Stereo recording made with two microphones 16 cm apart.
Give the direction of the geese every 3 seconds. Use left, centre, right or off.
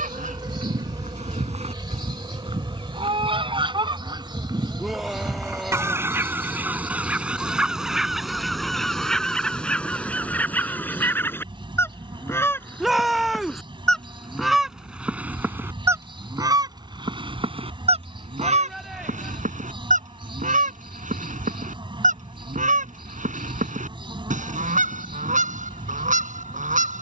right, right, centre, centre, centre, right, right, right, right.